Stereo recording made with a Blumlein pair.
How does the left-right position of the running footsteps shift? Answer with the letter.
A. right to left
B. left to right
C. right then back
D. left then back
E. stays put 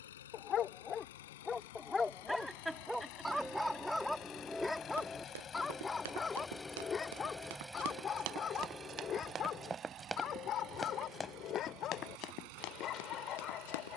A.